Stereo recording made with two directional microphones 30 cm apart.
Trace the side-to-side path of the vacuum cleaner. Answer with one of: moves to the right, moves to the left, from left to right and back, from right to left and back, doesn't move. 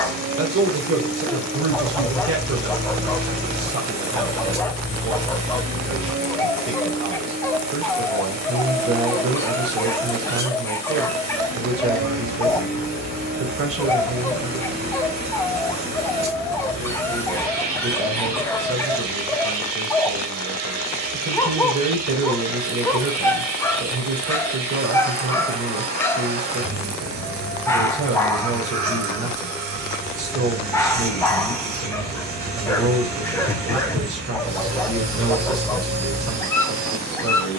doesn't move.